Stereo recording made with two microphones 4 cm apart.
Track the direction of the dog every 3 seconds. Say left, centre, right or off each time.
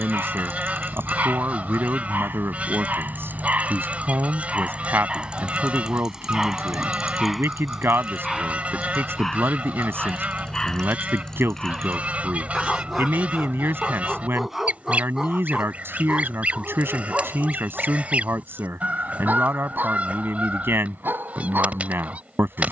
right, right, centre, centre, centre, right, right, right.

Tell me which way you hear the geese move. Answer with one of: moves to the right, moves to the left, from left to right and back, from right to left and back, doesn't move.
doesn't move.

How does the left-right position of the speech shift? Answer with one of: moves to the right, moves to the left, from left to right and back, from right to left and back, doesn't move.
doesn't move.